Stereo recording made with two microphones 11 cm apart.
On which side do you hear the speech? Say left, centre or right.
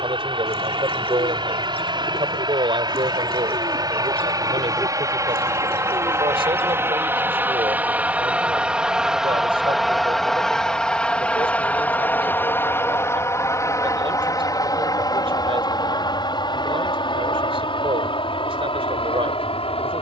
right.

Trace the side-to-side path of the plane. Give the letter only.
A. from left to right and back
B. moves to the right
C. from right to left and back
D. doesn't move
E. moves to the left
E.